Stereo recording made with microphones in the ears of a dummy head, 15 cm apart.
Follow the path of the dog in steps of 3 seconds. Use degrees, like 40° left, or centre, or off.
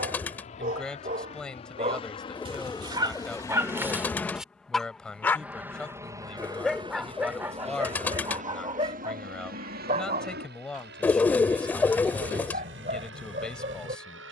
40° right, 10° right, 20° right, 40° right, 50° right.